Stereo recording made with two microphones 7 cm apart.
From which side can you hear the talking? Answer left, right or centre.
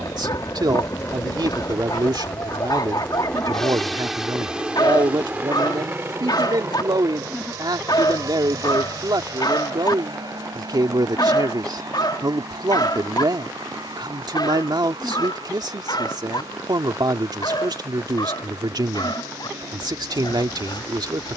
right.